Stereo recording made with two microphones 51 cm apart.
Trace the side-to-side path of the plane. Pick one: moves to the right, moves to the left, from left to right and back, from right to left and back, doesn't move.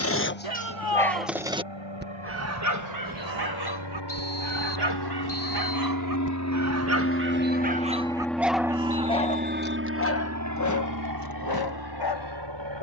moves to the right.